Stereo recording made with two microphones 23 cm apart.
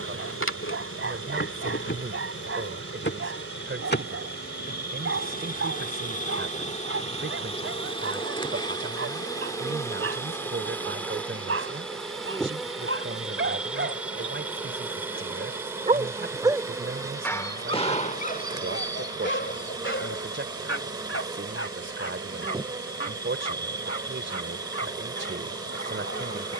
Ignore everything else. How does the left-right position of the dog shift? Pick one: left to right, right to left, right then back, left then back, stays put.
right to left.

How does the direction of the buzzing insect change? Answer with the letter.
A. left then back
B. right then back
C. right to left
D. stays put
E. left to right
E.